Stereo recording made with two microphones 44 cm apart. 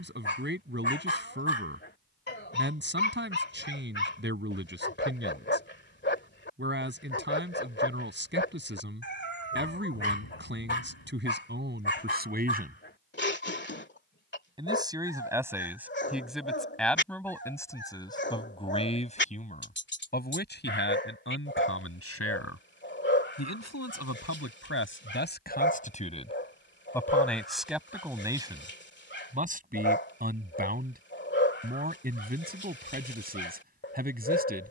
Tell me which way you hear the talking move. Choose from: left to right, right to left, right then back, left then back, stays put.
left then back.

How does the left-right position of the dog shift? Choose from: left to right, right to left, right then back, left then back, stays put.
stays put.